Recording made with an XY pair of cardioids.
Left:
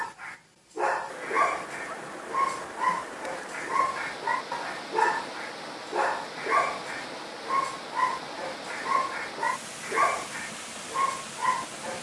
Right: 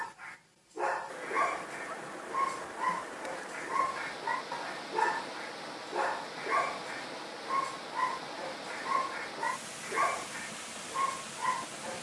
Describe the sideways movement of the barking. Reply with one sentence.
In this clip you hear the barking stay put.